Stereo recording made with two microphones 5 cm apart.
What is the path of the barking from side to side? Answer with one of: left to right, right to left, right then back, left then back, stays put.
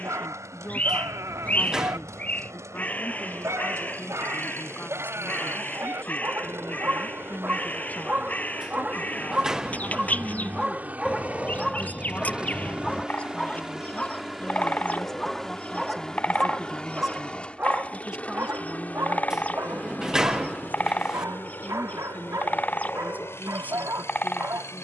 left then back.